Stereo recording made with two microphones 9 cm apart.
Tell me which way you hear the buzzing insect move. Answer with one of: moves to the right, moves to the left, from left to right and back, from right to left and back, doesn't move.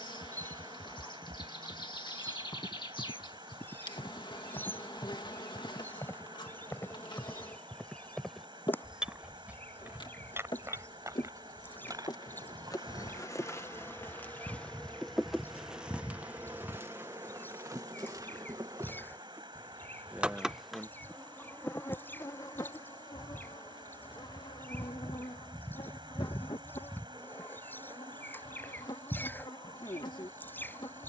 from left to right and back.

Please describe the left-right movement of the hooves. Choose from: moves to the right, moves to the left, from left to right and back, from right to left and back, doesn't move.
moves to the right.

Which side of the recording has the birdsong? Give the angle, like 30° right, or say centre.
20° left.